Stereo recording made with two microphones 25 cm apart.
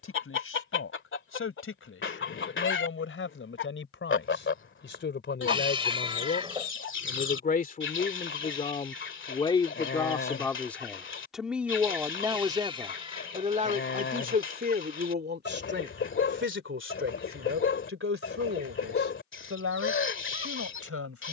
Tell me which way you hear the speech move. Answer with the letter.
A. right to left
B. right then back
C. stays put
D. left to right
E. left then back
D.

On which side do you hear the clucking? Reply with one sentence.
You can hear the clucking on the left.